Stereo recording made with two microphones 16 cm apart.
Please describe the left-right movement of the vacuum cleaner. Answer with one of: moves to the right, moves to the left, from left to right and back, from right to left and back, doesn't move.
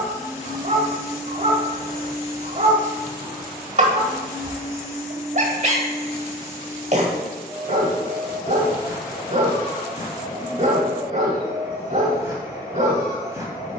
doesn't move.